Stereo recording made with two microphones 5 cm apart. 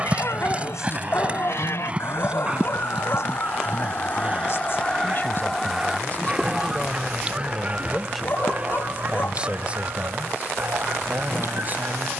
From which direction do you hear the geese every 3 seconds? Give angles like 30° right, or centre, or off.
60° left, 30° left, 30° right, 50° right.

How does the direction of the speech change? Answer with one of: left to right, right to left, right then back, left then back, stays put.
left to right.